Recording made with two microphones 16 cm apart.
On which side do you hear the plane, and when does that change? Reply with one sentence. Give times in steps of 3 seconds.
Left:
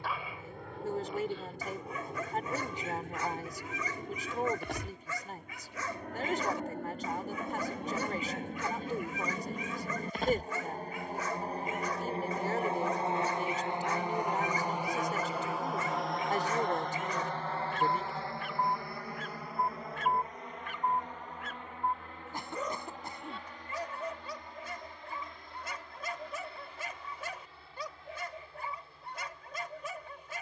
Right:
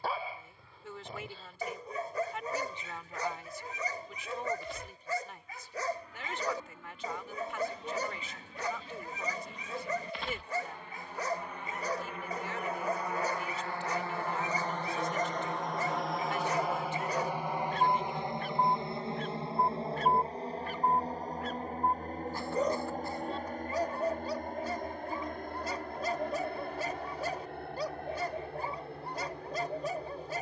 In this clip you hear the plane on the left from 0 s, in the centre from 15 s and on the right from 18 s.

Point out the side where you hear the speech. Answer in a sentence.
In this clip you hear the speech on the left.